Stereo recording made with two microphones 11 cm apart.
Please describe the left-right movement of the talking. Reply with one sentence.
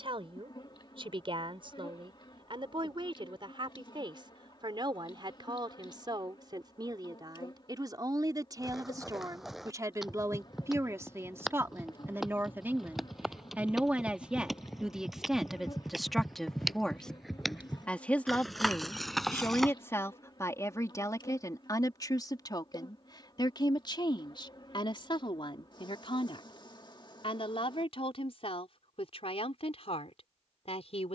In this clip you hear the talking move from right to left.